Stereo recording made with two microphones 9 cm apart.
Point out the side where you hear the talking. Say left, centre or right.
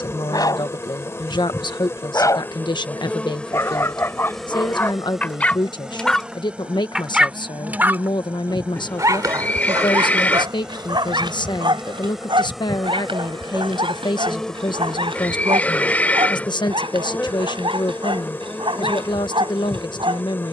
left.